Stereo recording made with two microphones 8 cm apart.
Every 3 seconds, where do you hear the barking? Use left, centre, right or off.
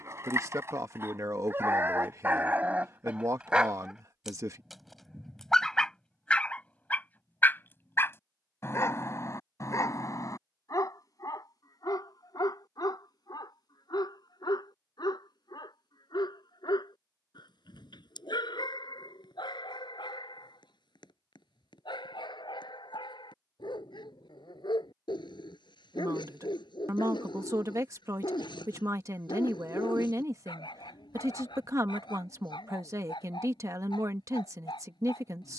right, centre, left, left, left, left, left, left, left, left, left, left.